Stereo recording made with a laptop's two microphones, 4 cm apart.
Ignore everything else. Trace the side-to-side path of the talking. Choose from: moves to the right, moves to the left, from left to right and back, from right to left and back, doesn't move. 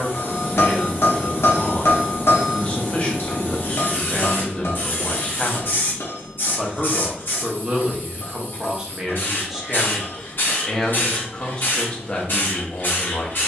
from left to right and back.